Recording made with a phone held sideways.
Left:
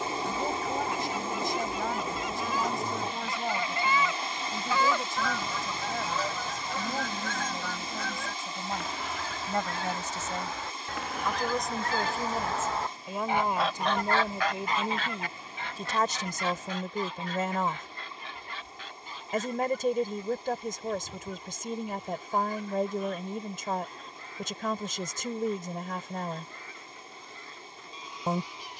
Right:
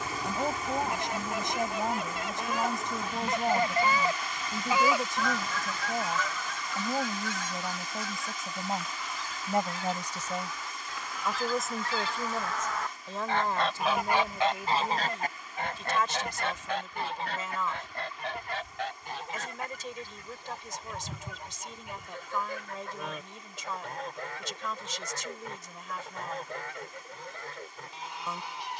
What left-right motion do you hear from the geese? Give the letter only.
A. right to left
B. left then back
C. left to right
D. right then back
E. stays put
B.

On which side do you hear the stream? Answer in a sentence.
You can hear the stream on the left.